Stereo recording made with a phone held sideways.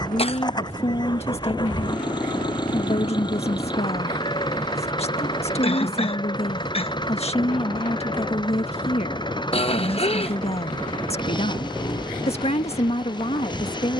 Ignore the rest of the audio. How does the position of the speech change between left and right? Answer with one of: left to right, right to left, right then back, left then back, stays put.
stays put.